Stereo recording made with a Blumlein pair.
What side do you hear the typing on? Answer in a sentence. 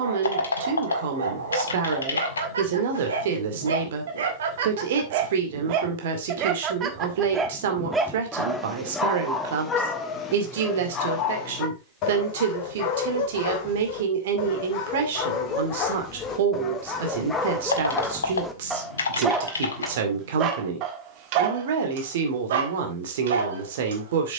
You can hear the typing on the left.